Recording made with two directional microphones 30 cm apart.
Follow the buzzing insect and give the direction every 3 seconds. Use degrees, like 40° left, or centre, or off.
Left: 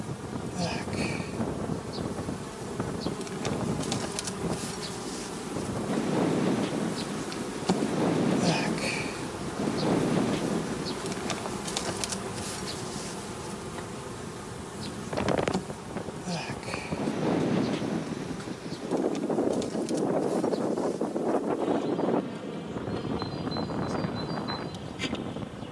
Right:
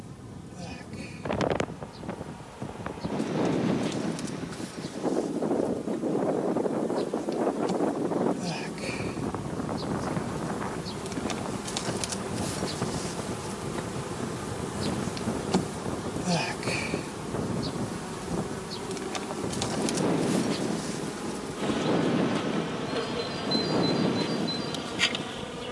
60° left, 50° left, 40° left, 20° left, 10° right, 30° right, 50° right, 60° right, 70° right.